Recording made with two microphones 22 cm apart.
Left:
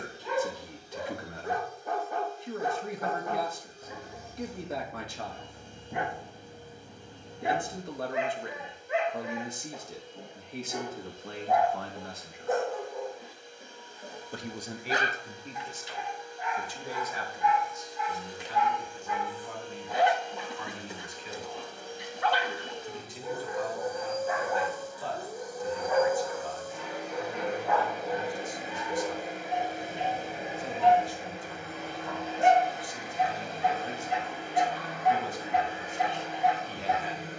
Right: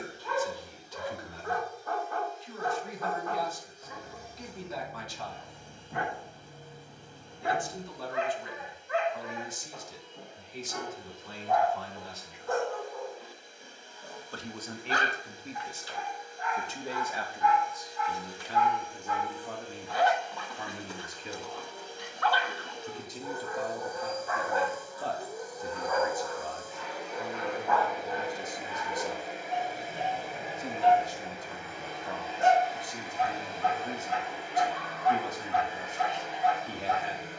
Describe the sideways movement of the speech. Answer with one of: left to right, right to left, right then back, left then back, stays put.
left to right.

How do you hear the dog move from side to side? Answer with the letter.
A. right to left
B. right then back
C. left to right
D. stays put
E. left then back
D.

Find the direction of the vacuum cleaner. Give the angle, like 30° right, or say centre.
50° left.